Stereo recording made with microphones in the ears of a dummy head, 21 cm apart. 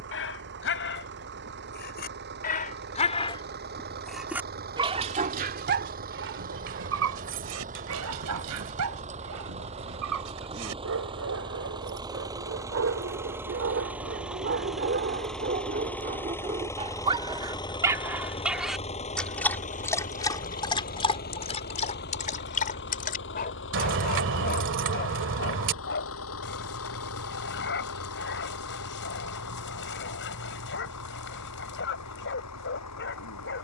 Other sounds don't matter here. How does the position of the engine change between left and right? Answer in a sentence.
You can hear the engine travel towards the left.